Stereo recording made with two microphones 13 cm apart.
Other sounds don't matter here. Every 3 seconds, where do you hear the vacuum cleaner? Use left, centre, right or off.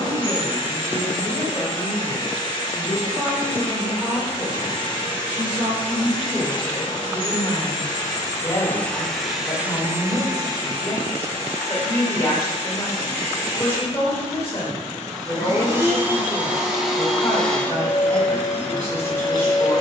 left, left, left, right, right, centre, left.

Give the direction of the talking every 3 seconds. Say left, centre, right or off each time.
right, right, centre, left, left, left, left.